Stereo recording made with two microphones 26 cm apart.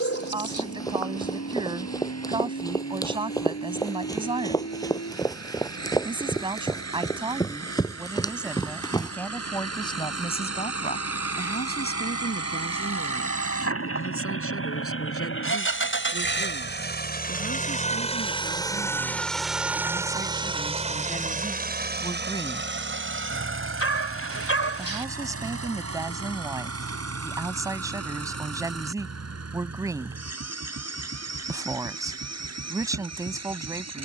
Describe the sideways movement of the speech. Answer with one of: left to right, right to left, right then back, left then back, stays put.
left then back.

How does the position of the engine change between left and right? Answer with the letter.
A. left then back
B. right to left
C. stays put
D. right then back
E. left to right
E.